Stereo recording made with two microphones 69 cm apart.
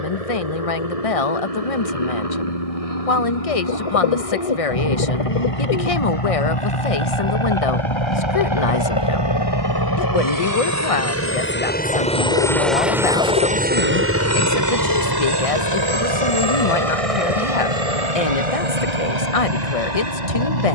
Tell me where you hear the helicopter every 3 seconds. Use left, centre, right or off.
left, left, left, left, centre, right, right.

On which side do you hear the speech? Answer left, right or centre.
left.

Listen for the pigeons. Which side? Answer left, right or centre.
left.